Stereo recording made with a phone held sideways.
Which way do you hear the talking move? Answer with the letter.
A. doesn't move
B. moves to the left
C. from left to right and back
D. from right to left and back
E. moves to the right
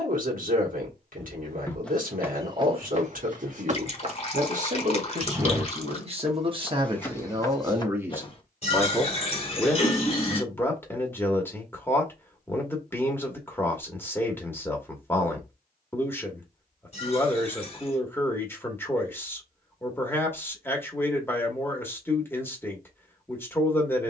B.